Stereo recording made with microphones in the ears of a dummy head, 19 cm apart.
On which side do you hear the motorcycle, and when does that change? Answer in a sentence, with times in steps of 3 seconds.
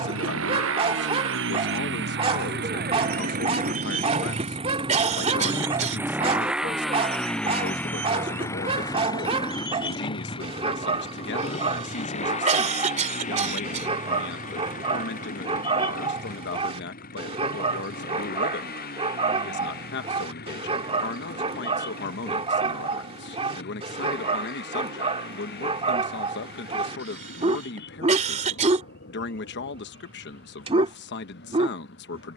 In this clip you hear the motorcycle on the right from 0 s, in the centre from 6 s and on the left from 9 s.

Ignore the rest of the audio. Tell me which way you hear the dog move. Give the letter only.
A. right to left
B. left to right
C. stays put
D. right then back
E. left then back
C.